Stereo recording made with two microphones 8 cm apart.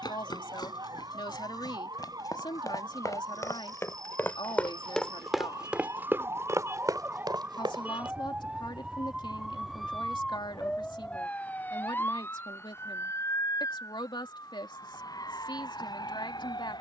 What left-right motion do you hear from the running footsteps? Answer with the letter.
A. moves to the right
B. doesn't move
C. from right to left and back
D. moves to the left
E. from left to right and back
A.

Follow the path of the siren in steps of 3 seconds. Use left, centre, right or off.
right, right, right, centre, left, left.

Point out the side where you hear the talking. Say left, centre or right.
left.